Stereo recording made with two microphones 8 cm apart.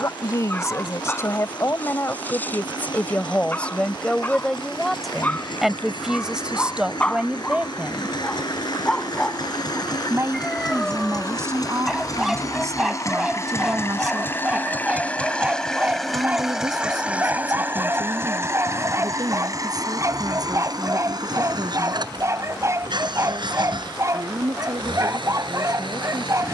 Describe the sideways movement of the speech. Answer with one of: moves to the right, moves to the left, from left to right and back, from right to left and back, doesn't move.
moves to the right.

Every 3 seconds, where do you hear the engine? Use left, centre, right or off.
left, left, left, left, left, centre, right, right, right.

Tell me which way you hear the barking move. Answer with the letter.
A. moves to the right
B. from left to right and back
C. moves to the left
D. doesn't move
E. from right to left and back
A.